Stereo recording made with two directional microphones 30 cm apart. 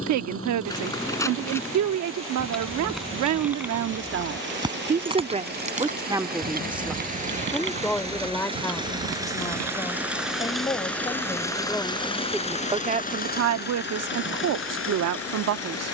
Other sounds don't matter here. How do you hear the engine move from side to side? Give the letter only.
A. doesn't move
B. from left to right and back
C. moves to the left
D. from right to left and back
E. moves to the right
C.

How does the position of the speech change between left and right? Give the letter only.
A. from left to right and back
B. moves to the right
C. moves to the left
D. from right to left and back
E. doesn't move
D.